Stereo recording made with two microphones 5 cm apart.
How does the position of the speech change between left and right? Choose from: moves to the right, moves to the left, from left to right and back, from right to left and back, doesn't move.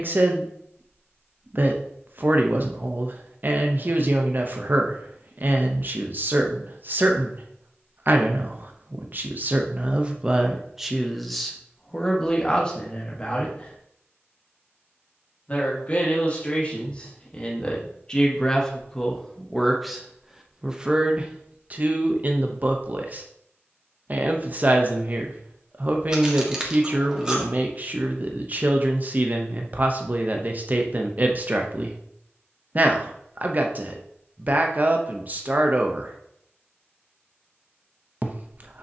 from right to left and back.